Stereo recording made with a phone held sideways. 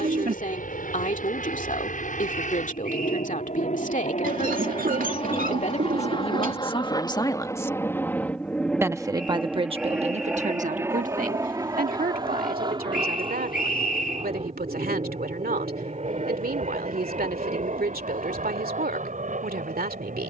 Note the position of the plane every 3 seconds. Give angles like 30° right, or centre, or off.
70° left, 50° left, 20° left, 10° right, 30° right, 40° right, 50° right.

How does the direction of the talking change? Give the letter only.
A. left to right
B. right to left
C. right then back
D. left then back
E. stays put
A.